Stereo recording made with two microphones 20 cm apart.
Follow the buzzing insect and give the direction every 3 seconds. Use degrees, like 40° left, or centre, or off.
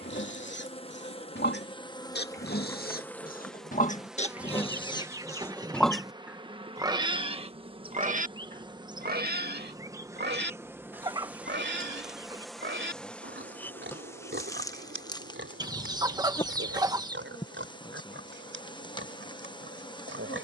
20° left, 10° right, 30° right, 10° right, 10° left, 20° left, 20° left.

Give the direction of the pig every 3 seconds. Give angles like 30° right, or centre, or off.
60° left, 30° left, 30° right, 60° right, 70° right, 80° right, 80° right.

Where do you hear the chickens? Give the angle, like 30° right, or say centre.
20° right.